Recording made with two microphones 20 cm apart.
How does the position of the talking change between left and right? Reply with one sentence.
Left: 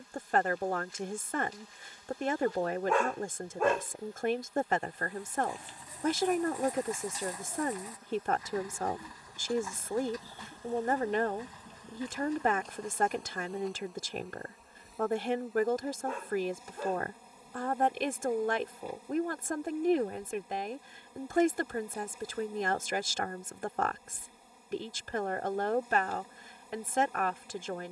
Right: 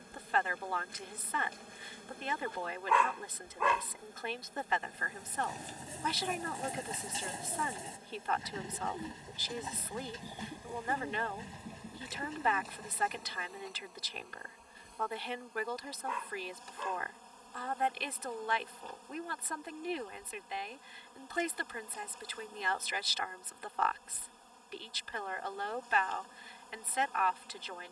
You can hear the talking stay in one place.